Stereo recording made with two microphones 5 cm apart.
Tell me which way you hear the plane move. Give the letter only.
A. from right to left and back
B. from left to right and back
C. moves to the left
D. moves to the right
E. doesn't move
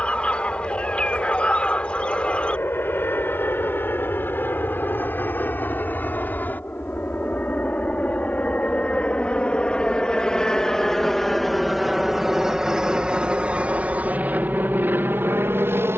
D.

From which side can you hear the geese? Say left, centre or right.
left.